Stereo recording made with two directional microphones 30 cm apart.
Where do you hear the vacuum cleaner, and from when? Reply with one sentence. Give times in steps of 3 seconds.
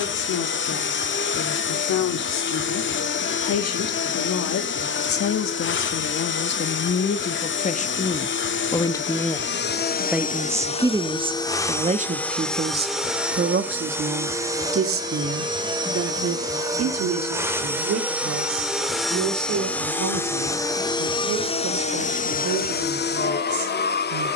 You can hear the vacuum cleaner on the left from 0 s, in the centre from 12 s and on the left from 21 s.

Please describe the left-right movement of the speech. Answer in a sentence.
You can hear the speech go from the left side to the right.